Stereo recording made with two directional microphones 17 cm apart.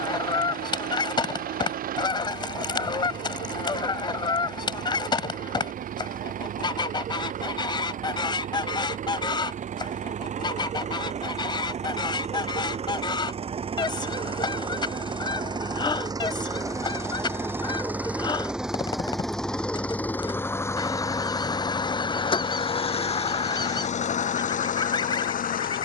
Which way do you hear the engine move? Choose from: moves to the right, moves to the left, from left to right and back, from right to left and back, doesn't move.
moves to the left.